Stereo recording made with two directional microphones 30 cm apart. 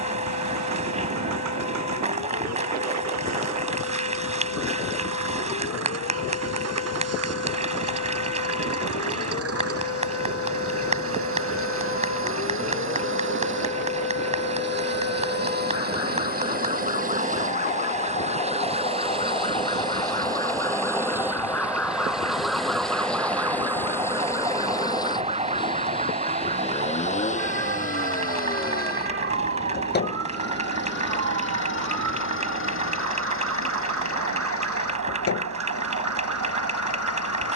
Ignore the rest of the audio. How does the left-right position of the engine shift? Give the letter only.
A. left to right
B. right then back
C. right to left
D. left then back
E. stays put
C.